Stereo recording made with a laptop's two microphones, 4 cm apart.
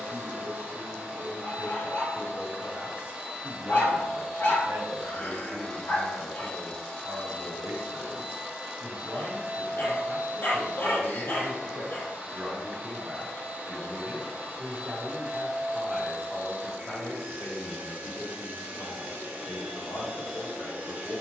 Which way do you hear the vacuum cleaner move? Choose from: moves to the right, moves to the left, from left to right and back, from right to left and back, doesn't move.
from right to left and back.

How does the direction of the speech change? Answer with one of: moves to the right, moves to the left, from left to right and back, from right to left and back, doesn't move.
moves to the left.